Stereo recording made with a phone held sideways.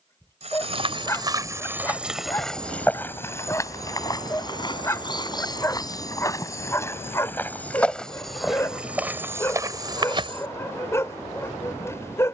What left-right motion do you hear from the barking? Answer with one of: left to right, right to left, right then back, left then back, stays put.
stays put.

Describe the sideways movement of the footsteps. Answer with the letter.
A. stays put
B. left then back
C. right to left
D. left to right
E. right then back
B.